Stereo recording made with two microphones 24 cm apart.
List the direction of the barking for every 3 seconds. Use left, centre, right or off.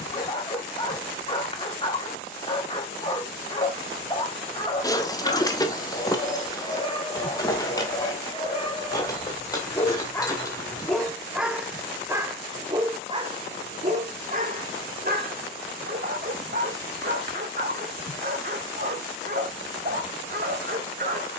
left, left, left, centre, right, right, right.